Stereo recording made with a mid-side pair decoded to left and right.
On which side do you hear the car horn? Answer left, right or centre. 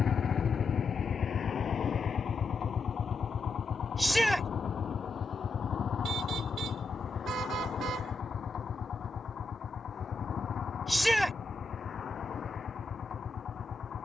right.